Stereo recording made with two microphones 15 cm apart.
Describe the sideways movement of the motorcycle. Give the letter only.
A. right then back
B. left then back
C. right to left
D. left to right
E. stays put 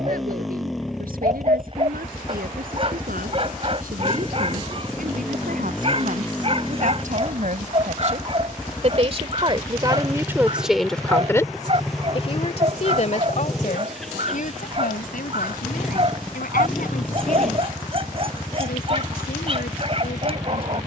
E.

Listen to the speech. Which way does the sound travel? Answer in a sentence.
In this clip you hear the speech travel towards the left.